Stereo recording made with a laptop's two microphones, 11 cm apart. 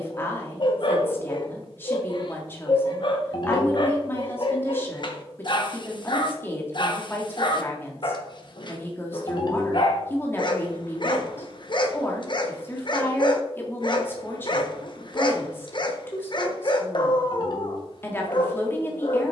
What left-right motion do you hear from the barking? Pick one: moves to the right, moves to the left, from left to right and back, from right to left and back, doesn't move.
doesn't move.